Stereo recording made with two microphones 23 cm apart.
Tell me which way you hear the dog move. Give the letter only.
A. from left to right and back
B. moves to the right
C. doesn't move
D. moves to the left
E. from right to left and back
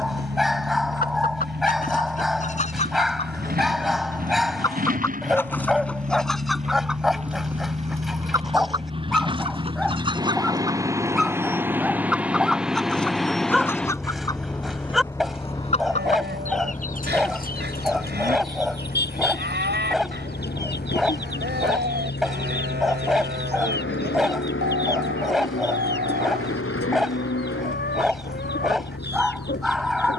C.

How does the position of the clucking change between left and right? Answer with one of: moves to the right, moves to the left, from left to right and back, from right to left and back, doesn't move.
from left to right and back.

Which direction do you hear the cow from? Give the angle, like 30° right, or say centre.
50° right.